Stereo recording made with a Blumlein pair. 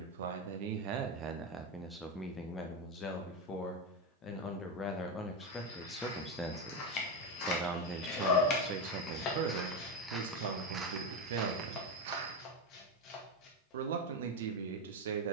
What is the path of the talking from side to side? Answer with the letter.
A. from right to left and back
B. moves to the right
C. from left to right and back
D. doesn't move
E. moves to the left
A.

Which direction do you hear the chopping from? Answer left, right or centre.
left.